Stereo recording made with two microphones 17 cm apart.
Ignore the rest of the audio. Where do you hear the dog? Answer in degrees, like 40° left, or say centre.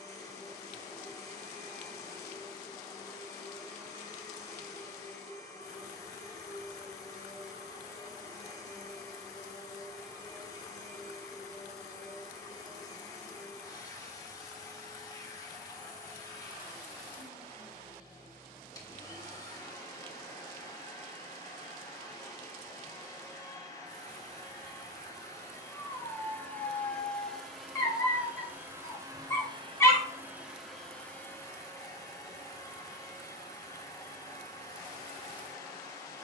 20° left.